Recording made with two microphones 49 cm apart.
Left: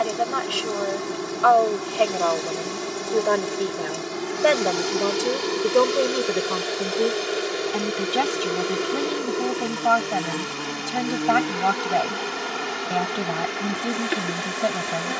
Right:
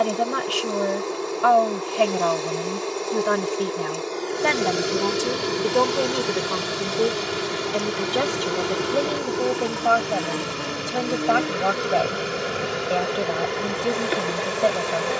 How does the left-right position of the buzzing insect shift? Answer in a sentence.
In this clip you hear the buzzing insect move from left to right and back again.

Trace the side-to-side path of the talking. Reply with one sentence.
You can hear the talking move to the left.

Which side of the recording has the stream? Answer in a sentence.
In this clip you hear the stream on the right.